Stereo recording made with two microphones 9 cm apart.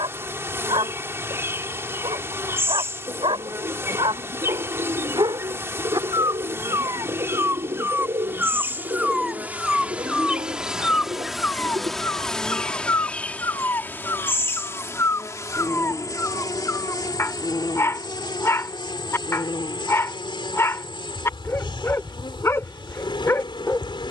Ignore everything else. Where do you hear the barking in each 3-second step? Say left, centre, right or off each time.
right, right, right, centre, left, left, left, left.